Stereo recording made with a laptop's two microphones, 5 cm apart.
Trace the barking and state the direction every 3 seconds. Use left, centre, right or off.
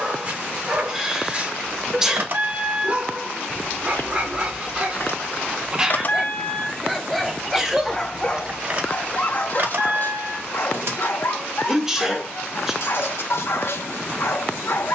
right, right, centre, left, left.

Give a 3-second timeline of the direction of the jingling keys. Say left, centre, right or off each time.
right, left, centre, right, off.